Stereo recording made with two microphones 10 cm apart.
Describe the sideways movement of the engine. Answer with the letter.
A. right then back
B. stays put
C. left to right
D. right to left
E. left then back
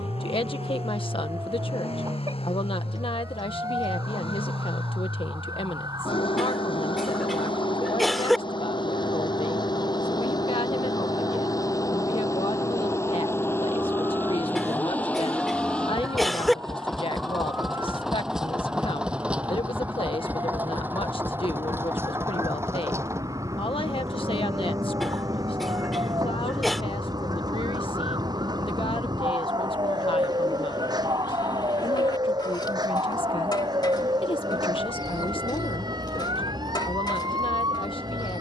C.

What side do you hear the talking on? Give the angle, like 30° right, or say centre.
60° left.